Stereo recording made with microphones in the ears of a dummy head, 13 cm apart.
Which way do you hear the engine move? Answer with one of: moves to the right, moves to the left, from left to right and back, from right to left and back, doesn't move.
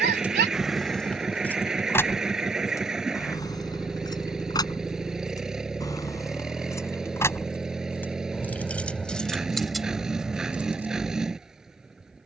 doesn't move.